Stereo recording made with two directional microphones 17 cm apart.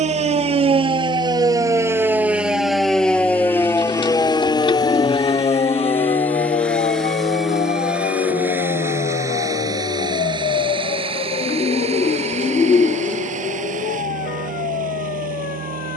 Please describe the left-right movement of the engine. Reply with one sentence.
You can hear the engine move from left to right.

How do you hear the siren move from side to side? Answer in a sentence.
In this clip you hear the siren move from right to left.